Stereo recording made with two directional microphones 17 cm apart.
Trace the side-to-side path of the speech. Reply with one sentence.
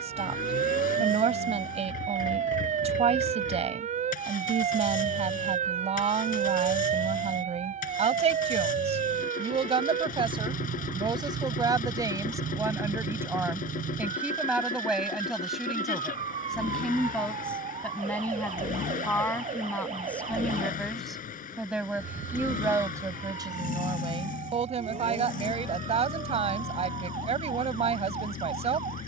In this clip you hear the speech move from right to left and back again.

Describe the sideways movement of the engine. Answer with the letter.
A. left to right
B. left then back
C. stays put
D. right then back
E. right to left
C.